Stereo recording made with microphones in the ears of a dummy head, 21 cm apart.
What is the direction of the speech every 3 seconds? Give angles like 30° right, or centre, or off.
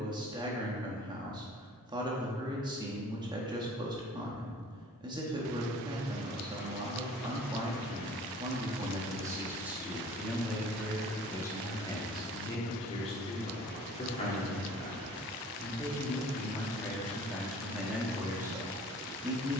20° right, 20° right, 20° right, centre, 30° left, 10° left, 10° right.